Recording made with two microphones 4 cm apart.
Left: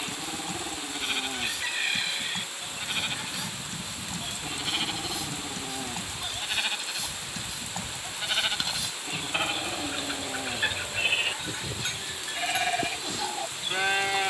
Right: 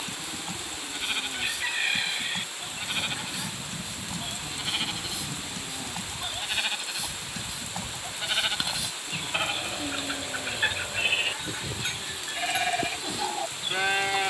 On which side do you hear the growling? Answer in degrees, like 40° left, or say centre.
30° left.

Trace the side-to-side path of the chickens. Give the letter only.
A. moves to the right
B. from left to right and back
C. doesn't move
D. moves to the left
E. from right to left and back
C.